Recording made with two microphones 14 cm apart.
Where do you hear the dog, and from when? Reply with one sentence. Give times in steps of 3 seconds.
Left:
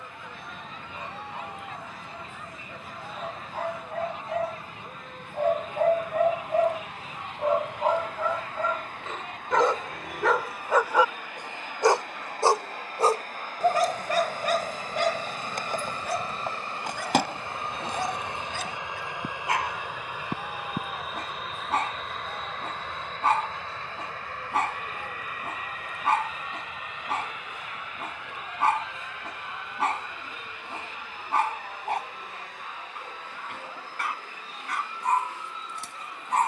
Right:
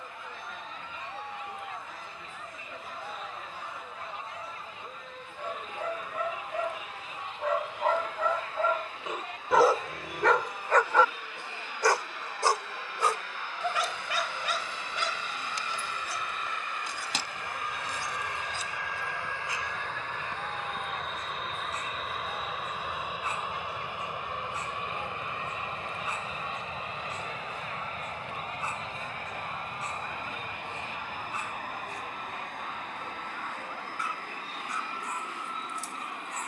In this clip you hear the dog on the left from 0 s, in the centre from 9 s and on the left from 12 s.